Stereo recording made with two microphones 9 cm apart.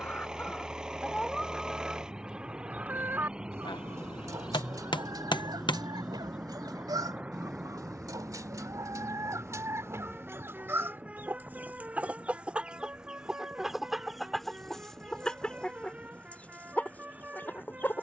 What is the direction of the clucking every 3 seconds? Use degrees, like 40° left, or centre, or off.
centre, 40° right, 50° right, 30° right, centre, 20° left.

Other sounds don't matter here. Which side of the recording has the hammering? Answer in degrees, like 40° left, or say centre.
60° left.